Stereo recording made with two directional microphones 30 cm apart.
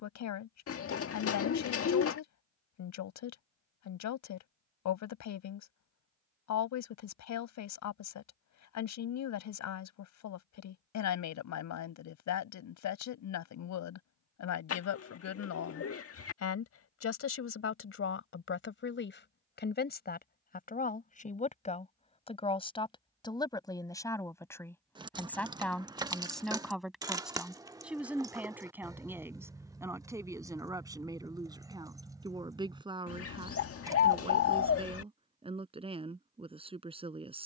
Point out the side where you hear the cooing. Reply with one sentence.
You can hear the cooing on the left.